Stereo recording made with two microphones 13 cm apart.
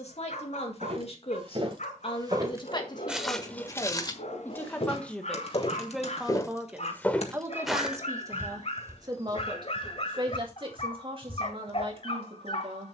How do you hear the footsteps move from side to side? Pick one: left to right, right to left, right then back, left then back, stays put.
left then back.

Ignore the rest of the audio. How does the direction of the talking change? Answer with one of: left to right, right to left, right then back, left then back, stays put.
left to right.